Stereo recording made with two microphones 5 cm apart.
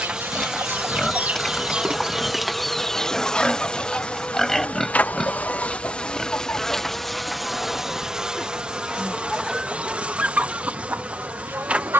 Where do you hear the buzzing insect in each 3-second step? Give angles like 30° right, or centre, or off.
10° right, 20° left, centre, 30° right.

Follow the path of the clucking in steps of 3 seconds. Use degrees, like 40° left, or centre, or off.
20° right, 40° left, 40° left, 30° right.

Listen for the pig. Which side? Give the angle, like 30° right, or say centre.
10° left.